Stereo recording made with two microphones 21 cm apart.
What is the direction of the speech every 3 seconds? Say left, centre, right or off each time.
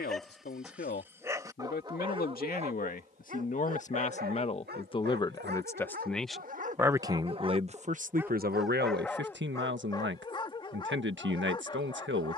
left, left, right, right.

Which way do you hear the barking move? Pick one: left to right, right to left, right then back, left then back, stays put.
right then back.